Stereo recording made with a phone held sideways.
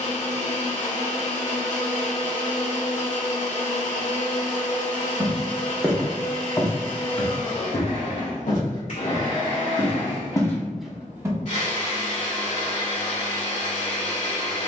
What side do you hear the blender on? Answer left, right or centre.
left.